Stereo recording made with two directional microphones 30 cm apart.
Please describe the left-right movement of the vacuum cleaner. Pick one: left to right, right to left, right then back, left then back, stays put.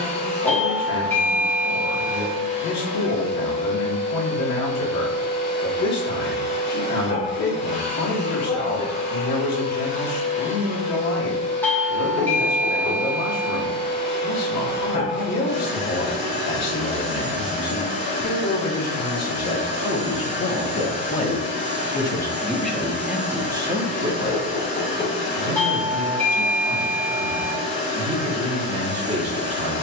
stays put.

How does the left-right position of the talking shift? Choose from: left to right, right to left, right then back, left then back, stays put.
left to right.